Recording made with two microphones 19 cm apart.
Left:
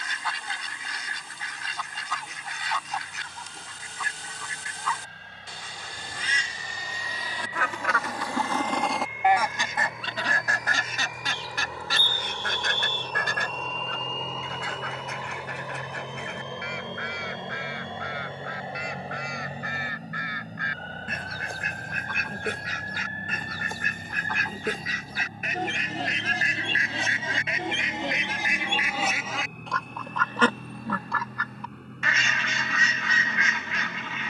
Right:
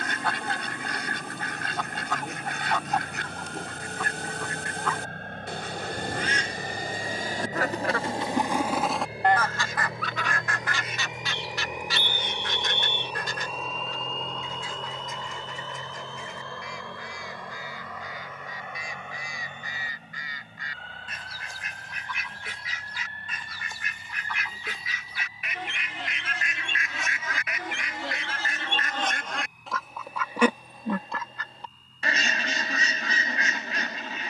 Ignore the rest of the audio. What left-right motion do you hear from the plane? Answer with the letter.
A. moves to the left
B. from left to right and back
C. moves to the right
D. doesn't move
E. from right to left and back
A.